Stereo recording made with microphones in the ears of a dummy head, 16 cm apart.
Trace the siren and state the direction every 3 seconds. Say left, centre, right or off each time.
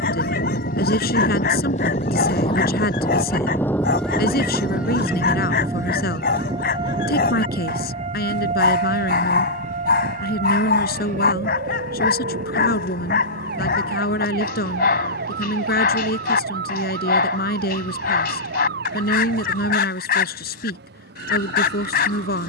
left, centre, right, right, right, right, right, right.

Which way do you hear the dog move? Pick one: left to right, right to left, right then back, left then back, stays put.
stays put.